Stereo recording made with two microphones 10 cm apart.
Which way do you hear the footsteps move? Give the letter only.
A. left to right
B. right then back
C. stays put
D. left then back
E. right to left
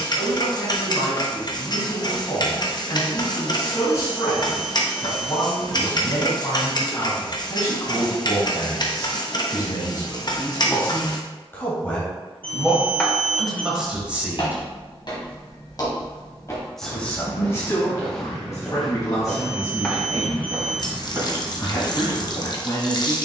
A.